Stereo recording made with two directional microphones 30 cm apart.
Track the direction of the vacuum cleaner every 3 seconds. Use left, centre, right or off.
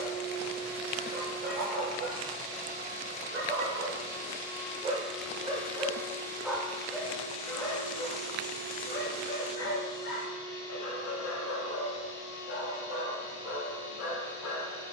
right, centre, left, left, left.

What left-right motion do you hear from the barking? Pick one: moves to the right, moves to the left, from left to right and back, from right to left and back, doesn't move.
moves to the left.